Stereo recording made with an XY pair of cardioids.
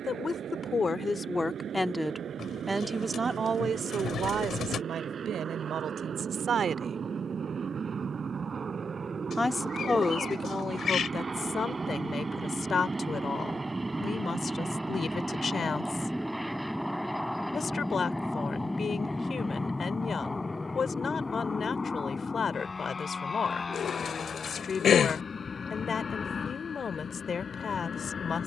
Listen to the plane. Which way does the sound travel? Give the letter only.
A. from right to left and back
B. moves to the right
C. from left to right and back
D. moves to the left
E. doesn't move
D.